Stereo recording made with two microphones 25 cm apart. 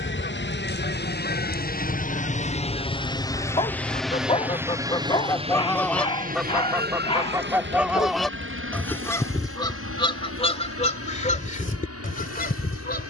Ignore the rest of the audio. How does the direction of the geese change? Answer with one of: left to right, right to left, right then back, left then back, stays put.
right then back.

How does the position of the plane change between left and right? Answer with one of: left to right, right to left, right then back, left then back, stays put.
left to right.